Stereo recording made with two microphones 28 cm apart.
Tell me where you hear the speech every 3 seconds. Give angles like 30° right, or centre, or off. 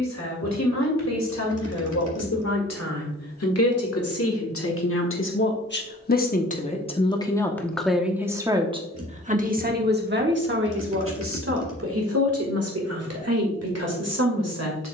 70° left, 50° left, 10° left, 40° right, 60° right.